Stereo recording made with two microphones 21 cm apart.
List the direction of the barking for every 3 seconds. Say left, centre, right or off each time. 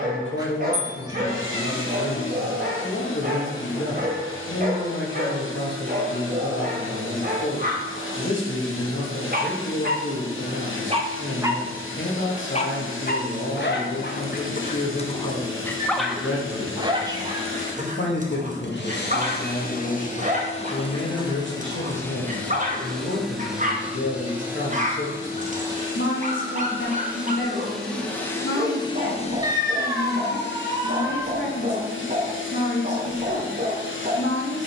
right, right, right, right, left, centre, right, right, right, right, right, right.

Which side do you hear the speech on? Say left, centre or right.
left.